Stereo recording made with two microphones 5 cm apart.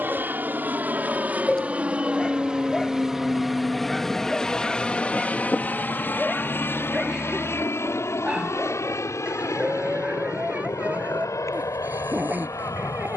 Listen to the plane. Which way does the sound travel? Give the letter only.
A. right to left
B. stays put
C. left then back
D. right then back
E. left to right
A.